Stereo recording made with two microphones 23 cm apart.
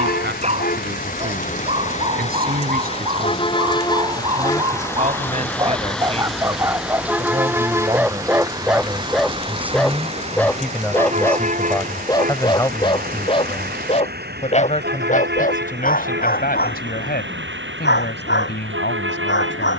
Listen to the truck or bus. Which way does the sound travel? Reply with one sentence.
You can hear the truck or bus move from left to right.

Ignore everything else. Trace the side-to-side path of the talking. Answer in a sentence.
You can hear the talking move from right to left.